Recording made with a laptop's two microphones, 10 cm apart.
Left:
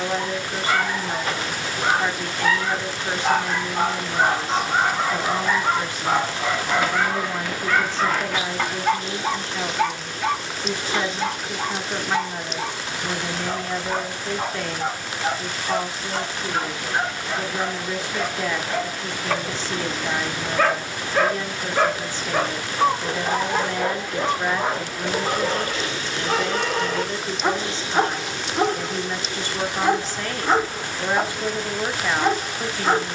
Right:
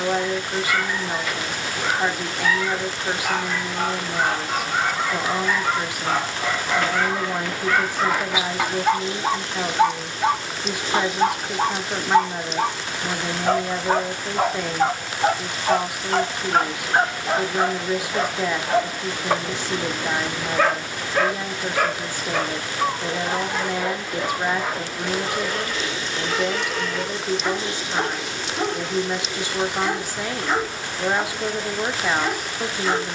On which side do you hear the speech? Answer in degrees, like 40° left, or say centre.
10° right.